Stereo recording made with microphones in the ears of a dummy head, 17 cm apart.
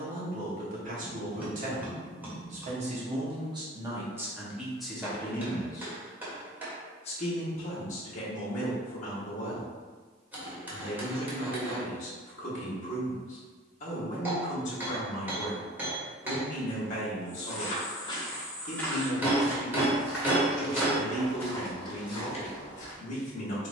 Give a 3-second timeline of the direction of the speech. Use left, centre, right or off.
right, centre, left, left, left, left, left, left.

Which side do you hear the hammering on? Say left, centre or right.
centre.